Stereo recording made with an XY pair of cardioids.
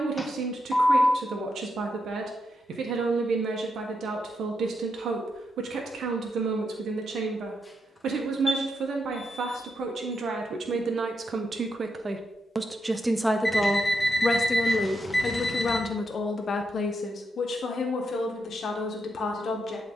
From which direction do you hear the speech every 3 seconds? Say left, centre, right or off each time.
right, right, right, right, centre, left, left.